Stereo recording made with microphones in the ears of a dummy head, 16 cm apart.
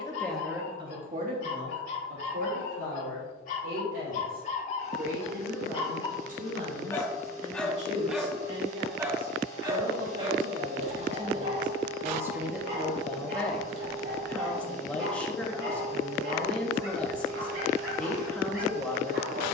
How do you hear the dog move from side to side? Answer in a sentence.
In this clip you hear the dog move to the right.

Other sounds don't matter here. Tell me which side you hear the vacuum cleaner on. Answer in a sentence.
You can hear the vacuum cleaner on the right.